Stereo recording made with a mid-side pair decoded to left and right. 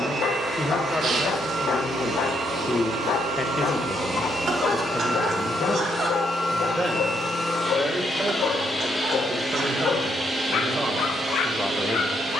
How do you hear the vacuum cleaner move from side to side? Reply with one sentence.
In this clip you hear the vacuum cleaner move from right to left and back again.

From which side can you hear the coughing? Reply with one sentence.
In this clip you hear the coughing on the right.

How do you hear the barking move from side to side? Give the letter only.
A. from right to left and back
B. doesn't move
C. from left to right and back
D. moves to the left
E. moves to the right
B.